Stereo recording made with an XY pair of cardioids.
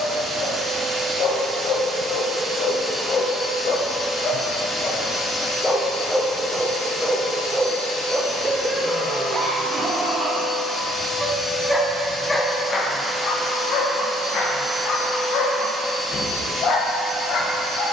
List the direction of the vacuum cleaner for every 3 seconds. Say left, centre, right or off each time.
right, left, left, left, centre, right.